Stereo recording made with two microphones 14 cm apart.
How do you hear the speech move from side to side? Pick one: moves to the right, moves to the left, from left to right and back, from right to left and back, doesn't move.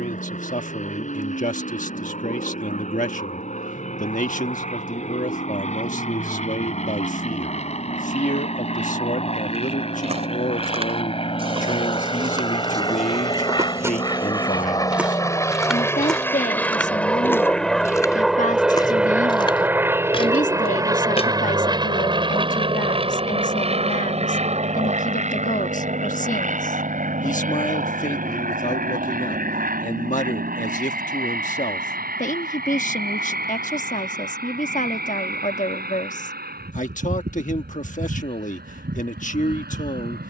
doesn't move.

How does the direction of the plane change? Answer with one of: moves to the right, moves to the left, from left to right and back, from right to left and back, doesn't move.
moves to the right.